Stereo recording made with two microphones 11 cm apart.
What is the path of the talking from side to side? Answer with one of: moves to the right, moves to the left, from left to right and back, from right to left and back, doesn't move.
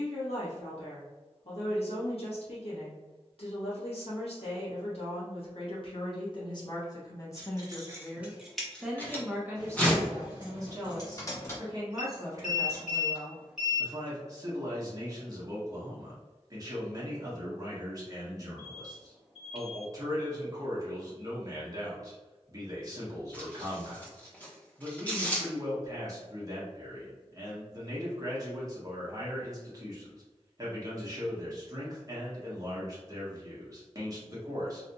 moves to the right.